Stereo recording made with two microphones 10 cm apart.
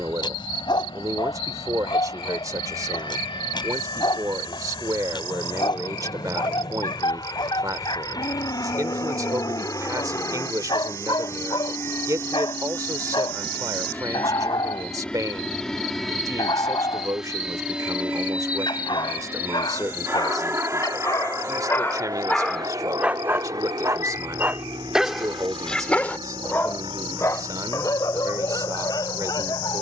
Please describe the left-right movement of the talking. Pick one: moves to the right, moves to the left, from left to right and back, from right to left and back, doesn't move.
doesn't move.